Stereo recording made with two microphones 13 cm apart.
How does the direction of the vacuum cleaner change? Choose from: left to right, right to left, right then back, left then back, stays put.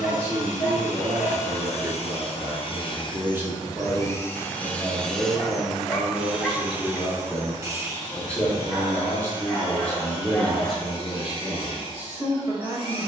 left to right.